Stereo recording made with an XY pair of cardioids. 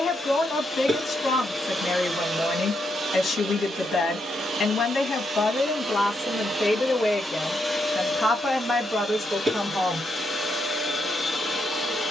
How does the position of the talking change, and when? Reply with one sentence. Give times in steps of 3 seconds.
You can hear the talking on the left from 0 s and in the centre from 9 s.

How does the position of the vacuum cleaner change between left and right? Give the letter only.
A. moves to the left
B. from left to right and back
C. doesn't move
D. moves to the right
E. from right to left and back
B.